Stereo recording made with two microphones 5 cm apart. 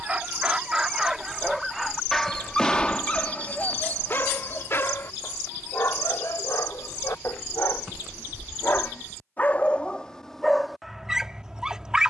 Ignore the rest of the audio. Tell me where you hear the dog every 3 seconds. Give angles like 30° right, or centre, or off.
centre, 40° left, 60° left, centre.